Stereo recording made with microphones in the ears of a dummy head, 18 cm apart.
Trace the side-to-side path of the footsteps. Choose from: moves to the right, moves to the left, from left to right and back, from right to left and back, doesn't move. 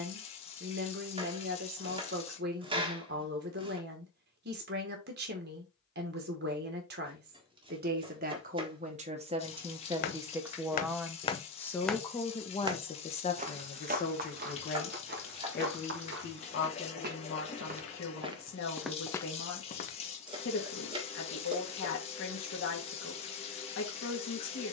from left to right and back.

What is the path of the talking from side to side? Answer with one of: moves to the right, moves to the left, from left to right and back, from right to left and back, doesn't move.
moves to the left.